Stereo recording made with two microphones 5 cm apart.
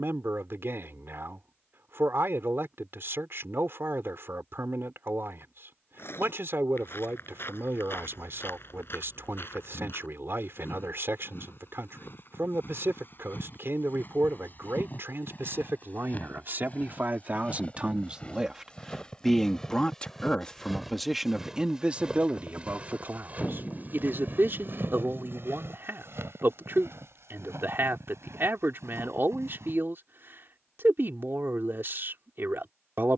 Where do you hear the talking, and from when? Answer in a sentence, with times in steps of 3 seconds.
You can hear the talking on the right from 0 s, in the centre from 18 s and on the right from 21 s.